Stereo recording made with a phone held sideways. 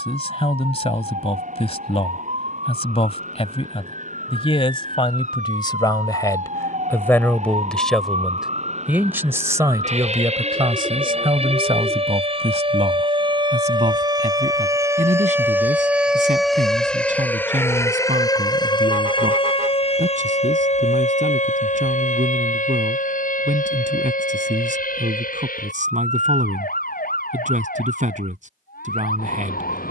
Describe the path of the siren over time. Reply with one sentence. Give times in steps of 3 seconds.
In this clip you hear the siren on the right from 0 s, in the centre from 15 s and on the left from 18 s.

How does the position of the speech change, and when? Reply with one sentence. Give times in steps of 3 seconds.
You can hear the speech on the left from 0 s, in the centre from 6 s and on the right from 9 s.